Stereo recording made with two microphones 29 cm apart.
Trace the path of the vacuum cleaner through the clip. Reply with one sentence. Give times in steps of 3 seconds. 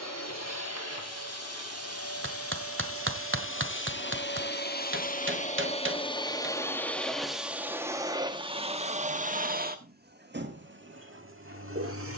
You can hear the vacuum cleaner on the left from 0 s, in the centre from 6 s and on the right from 9 s.